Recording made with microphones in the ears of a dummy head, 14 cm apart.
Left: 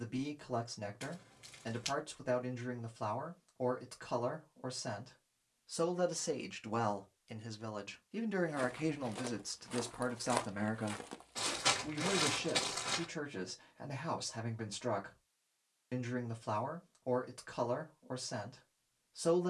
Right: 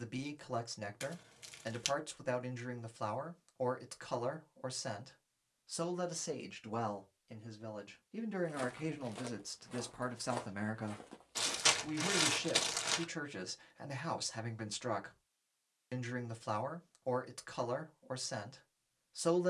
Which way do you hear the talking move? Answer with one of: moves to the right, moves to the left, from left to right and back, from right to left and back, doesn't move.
from right to left and back.